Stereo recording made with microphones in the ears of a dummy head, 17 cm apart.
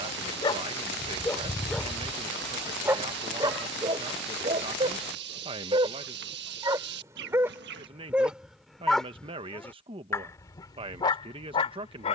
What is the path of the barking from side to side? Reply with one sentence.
In this clip you hear the barking move from left to right and back again.